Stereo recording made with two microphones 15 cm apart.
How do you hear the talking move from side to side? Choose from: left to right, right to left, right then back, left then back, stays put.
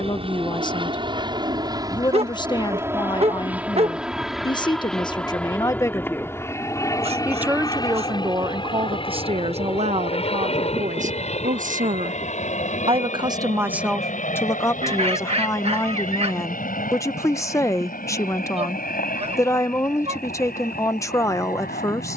right then back.